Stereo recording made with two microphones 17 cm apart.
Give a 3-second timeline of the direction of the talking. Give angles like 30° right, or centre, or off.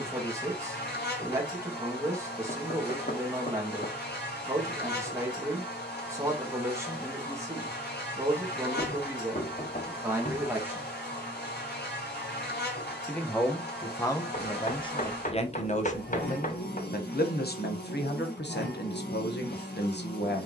20° right, 20° right, 20° right, 10° right, 20° left, 50° left, 80° left.